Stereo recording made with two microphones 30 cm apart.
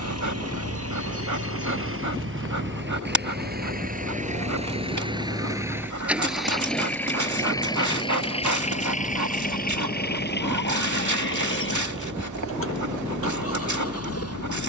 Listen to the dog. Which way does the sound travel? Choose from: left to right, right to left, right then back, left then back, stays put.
stays put.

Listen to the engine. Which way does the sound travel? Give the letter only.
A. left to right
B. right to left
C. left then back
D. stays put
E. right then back
B.